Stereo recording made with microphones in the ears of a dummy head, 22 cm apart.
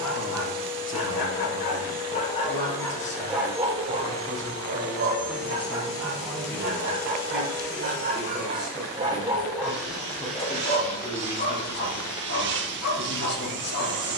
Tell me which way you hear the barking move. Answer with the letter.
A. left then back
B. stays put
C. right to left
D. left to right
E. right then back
E.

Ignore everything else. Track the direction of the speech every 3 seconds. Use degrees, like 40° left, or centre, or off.
50° left, 10° left, centre, 20° left, 40° left.